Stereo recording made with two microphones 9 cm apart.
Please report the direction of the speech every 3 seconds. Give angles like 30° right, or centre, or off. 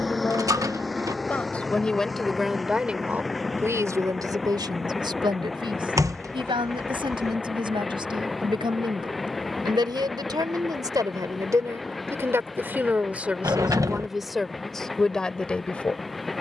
10° left, 50° right, 80° right, 50° right, 10° right, 10° left.